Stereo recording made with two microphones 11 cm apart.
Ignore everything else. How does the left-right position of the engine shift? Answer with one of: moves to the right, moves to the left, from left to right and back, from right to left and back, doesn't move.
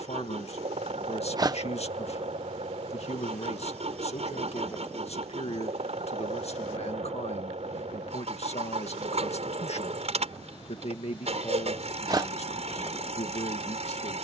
doesn't move.